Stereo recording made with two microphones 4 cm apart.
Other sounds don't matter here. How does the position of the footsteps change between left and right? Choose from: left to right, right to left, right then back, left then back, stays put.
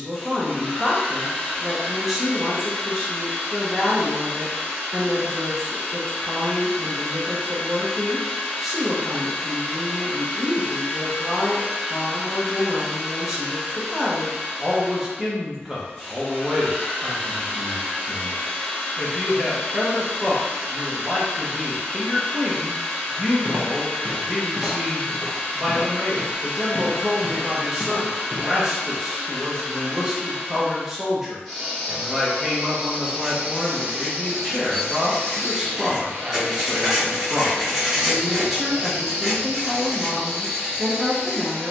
left then back.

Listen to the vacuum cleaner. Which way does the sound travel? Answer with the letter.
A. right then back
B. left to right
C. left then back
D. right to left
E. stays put
B.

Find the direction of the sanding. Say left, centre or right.
centre.